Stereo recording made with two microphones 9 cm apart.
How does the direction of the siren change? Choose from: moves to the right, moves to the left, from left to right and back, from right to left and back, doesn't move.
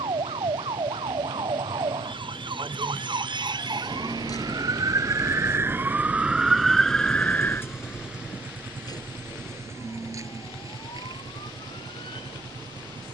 moves to the left.